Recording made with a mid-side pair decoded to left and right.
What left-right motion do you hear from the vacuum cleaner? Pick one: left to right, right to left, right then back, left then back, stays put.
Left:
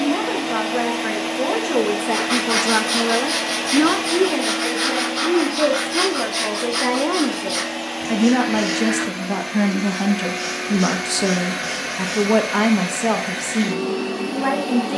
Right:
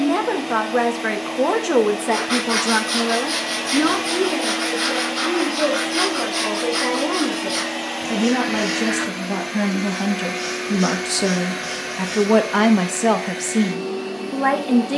right then back.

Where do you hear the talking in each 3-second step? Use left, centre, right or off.
right, left, left, centre, right.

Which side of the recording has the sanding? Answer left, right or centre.
centre.